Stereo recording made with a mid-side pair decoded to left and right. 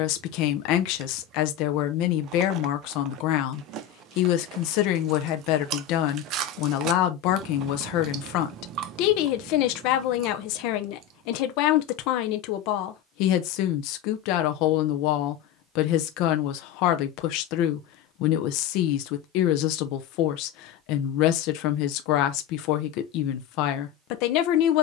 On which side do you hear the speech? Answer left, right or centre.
left.